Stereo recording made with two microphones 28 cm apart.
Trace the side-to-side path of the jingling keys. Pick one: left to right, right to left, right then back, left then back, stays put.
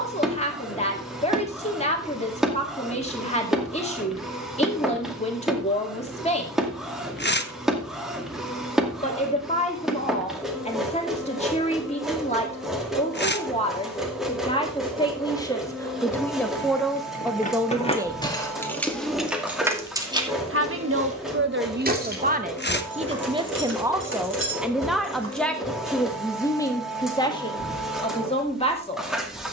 left to right.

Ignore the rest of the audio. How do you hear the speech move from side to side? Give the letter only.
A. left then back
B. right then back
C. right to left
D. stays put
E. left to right
B.